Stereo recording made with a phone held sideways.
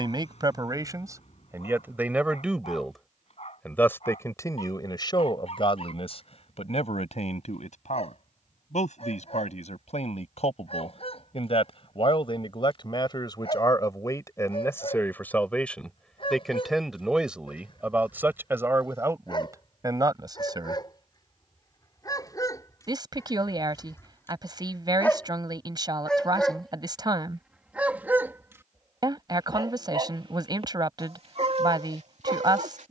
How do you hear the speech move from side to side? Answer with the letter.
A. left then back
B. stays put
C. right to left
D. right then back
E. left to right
A.